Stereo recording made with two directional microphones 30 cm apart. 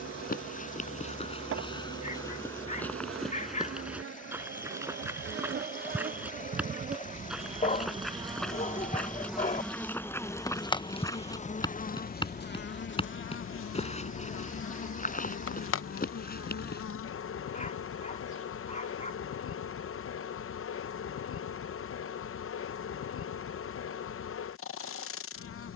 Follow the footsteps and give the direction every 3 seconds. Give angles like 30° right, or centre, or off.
20° left, 10° right, centre, 10° left, 20° left, 30° left, off, off, off.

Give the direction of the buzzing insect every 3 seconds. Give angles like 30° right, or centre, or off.
50° right, 40° right, 20° right, 10° left, 40° left, 50° left, 50° left, 50° left, 50° left.